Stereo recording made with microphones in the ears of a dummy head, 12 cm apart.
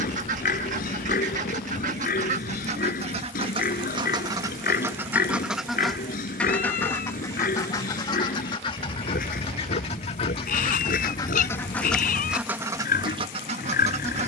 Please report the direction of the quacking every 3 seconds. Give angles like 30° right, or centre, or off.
60° right, 20° right, 30° left, 30° left, 30° right.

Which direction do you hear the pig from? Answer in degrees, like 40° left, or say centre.
70° left.